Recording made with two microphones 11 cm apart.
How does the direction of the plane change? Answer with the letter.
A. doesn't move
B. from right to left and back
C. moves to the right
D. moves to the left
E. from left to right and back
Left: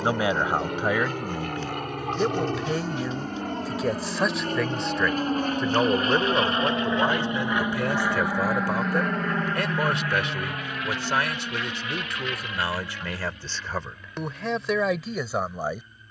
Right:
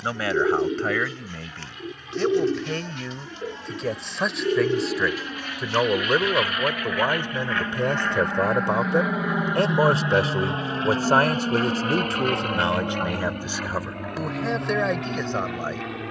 C.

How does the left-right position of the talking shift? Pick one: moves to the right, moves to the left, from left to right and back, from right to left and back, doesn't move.
from left to right and back.